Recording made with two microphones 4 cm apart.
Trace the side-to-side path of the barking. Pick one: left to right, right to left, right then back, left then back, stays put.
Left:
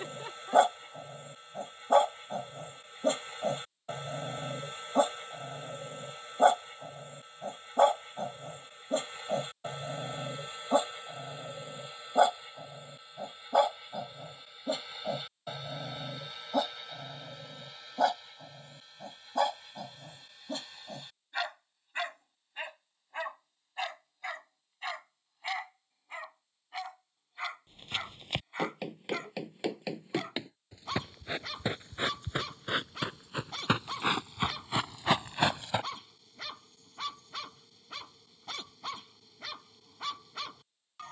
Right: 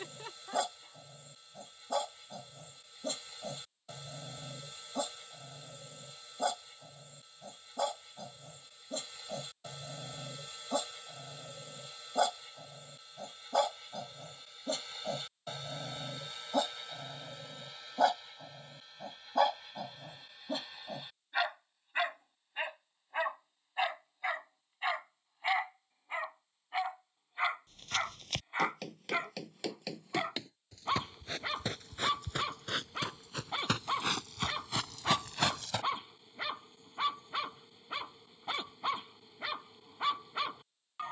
left to right.